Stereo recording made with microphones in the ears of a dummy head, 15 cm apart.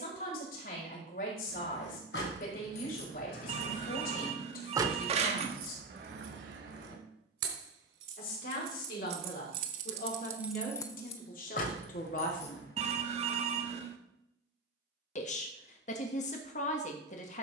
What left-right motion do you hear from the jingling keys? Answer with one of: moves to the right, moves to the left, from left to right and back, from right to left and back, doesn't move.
from left to right and back.